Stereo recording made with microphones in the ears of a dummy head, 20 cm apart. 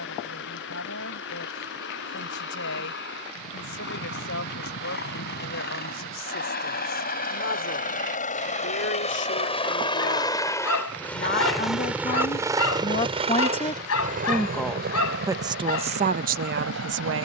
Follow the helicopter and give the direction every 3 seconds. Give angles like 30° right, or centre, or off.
60° left, 60° left, 40° left, 10° left, 30° right, 60° right.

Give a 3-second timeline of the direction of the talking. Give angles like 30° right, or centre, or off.
60° left, 60° left, 60° left, 50° left, 20° left, 40° right.